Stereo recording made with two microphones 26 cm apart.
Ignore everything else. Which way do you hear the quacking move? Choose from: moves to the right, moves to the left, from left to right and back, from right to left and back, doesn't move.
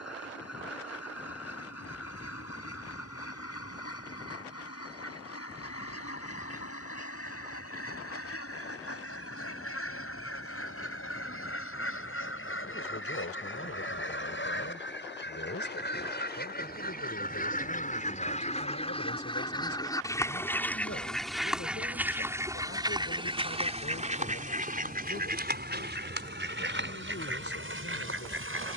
moves to the right.